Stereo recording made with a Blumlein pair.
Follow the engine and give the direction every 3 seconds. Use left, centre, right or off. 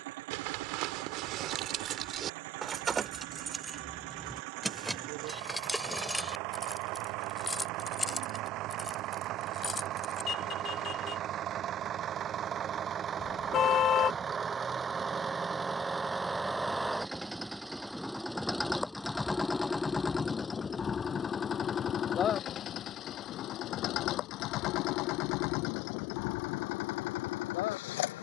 right, right, right, right, right, centre, centre, left, left, left.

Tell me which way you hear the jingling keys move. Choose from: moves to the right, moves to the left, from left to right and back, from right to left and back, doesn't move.
moves to the left.